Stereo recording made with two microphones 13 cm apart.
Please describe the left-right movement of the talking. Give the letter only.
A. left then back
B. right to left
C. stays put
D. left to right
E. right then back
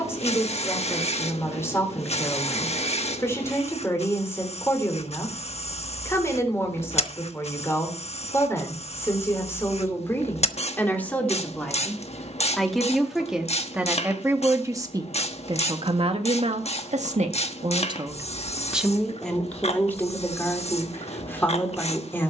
E.